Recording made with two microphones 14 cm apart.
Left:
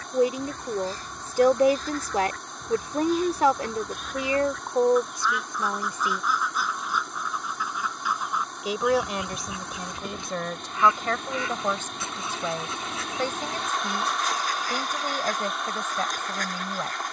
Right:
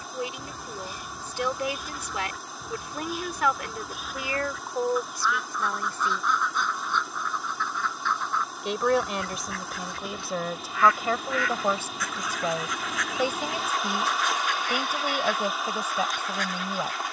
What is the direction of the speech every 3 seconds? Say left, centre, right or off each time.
left, left, centre, centre, centre, centre.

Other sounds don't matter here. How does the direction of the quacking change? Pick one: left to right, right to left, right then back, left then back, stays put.
right to left.